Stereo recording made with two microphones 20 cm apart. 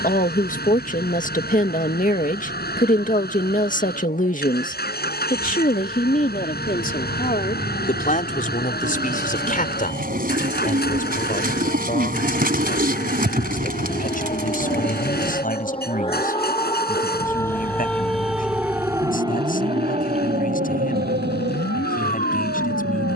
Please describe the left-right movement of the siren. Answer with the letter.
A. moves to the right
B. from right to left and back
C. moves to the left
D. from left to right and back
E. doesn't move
A.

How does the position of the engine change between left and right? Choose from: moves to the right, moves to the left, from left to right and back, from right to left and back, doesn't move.
doesn't move.